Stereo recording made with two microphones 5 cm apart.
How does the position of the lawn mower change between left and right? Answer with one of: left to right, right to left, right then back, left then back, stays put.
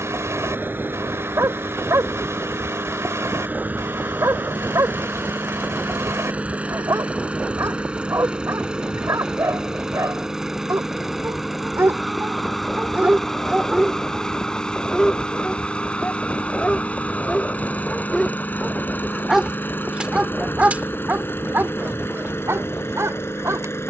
right to left.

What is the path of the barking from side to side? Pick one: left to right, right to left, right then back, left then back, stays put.
left then back.